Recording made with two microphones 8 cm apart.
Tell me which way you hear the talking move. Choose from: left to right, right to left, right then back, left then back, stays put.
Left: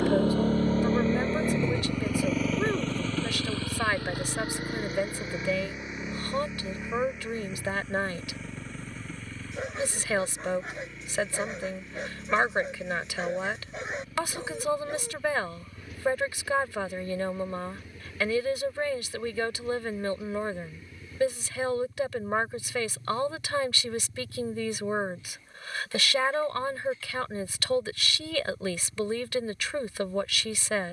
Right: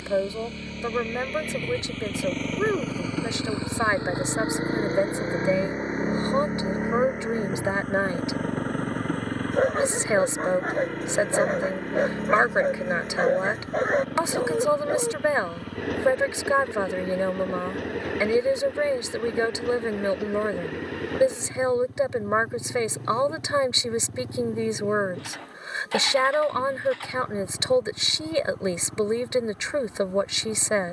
stays put.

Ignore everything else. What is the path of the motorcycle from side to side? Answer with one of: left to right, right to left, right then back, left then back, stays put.
left to right.